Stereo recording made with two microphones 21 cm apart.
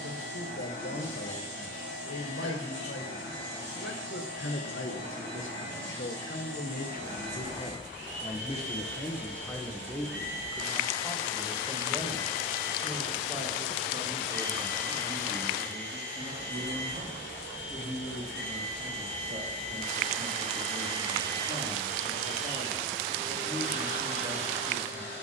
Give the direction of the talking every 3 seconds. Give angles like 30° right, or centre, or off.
80° left, 70° left, 40° left, centre, 20° right, 30° right, 30° right, 30° right, 30° right.